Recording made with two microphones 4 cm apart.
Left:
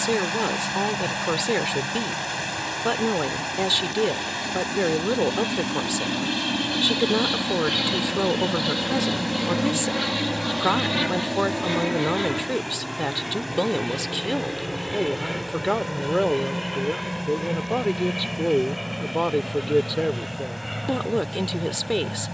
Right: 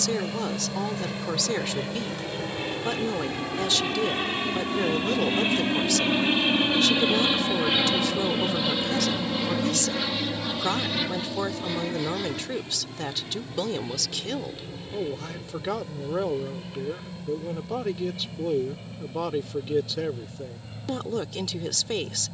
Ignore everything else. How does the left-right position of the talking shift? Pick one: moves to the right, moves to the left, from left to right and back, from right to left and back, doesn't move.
doesn't move.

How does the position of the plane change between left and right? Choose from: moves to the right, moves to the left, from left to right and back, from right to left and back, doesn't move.
moves to the left.